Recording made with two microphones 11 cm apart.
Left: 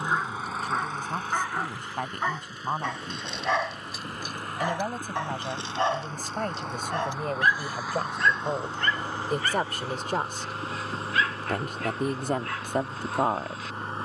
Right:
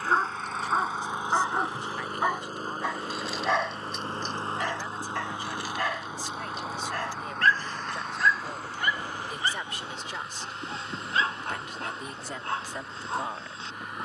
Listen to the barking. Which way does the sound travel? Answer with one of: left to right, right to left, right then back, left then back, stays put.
left then back.